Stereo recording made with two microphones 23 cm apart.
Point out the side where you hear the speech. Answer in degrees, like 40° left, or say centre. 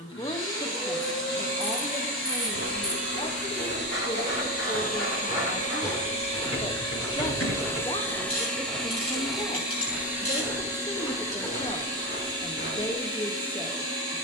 20° left.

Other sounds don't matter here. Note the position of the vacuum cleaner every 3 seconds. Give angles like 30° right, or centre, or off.
60° left, 40° left, 10° left, 10° right, 20° right.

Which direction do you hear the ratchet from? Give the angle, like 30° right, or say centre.
80° left.